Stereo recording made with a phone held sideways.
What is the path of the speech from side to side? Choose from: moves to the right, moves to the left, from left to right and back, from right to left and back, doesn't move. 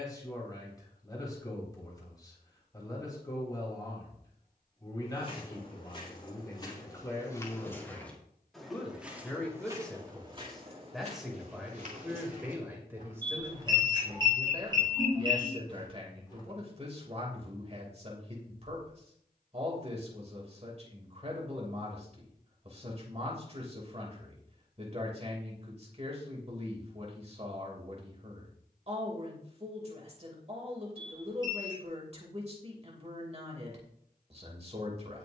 moves to the right.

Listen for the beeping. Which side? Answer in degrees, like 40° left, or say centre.
30° right.